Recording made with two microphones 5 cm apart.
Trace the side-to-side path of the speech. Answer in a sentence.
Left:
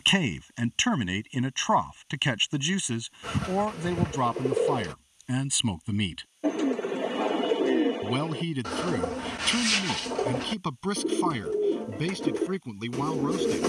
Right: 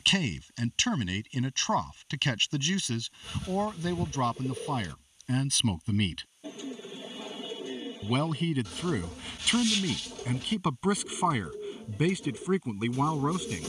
In this clip you hear the speech move to the right.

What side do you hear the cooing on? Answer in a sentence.
In this clip you hear the cooing on the left.